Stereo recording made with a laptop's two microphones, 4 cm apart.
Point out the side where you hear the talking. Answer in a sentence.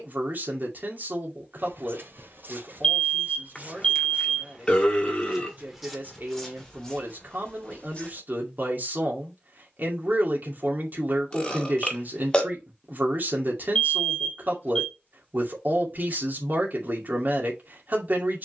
You can hear the talking on the right.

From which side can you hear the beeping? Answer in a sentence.
You can hear the beeping on the left.